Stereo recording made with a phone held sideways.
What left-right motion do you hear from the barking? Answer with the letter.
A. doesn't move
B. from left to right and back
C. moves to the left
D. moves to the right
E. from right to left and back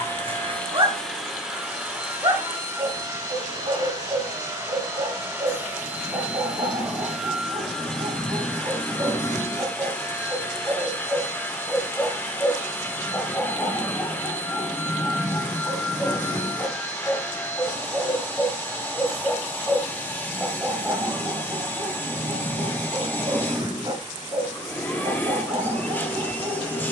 E.